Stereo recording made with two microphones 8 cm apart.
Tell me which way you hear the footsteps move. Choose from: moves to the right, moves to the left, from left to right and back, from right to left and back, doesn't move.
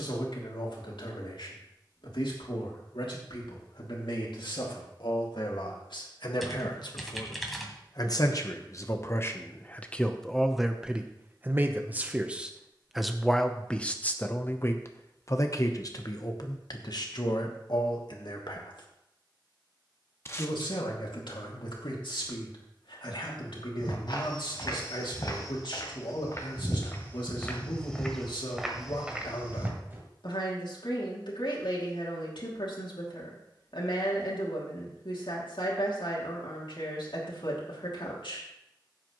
moves to the right.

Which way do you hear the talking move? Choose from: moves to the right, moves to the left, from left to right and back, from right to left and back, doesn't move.
from left to right and back.